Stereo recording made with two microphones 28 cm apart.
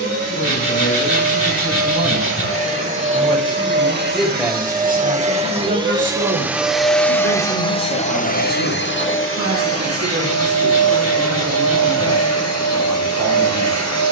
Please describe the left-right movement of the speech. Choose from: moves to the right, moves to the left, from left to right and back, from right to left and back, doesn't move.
moves to the right.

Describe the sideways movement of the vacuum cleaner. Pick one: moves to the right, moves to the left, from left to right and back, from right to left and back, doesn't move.
moves to the left.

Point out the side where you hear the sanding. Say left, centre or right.
left.